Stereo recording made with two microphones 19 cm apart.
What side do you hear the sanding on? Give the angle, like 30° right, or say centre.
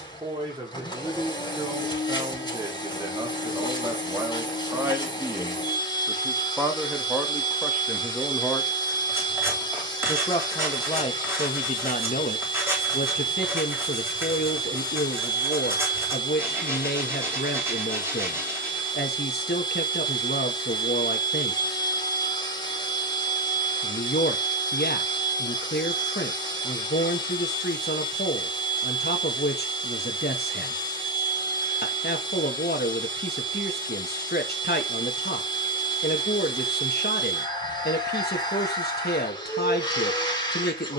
10° right.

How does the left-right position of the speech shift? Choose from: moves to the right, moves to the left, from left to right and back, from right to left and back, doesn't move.
moves to the left.